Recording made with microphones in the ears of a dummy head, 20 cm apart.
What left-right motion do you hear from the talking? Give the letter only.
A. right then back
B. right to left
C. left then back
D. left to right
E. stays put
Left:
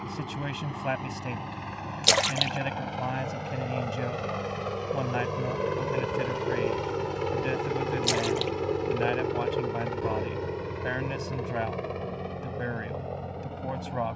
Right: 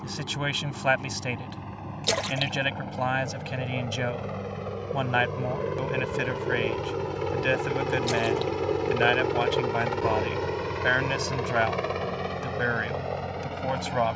E.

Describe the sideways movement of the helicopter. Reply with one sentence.
In this clip you hear the helicopter travel towards the right.